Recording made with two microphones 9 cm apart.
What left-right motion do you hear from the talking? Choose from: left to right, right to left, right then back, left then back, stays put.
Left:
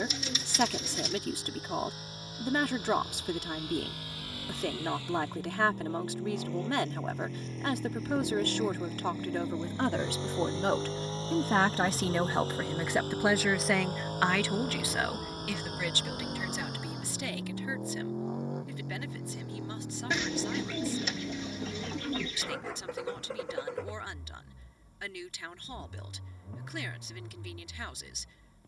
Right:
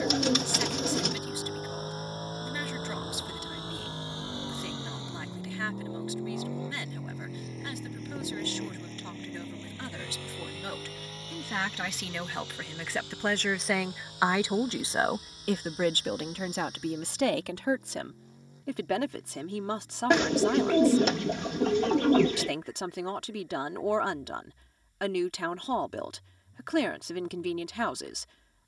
left to right.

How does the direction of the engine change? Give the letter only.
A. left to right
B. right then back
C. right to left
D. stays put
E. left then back
C.